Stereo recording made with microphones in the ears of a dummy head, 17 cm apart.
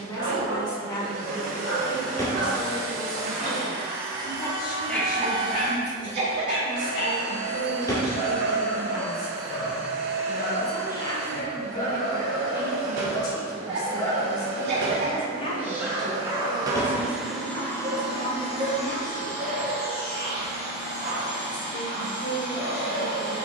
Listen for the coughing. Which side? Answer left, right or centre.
right.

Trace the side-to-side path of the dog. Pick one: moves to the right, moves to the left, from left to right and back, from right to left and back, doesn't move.
from right to left and back.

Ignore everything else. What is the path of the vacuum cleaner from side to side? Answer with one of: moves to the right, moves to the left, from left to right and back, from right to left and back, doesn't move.
moves to the left.